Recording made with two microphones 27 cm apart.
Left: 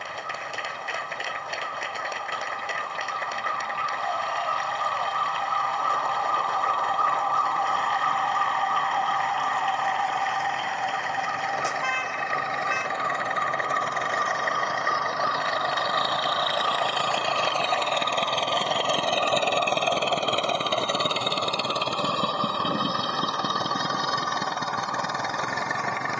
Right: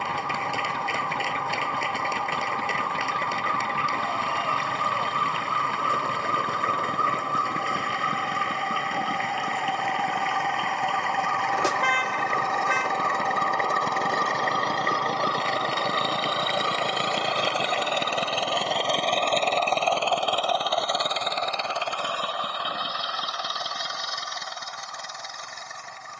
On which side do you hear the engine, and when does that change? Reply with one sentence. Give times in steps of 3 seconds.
You can hear the engine on the right from 0 s, in the centre from 18 s and on the left from 21 s.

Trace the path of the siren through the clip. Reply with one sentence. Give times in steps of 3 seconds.
You can hear the siren on the right from 0 s, in the centre from 9 s and on the left from 12 s.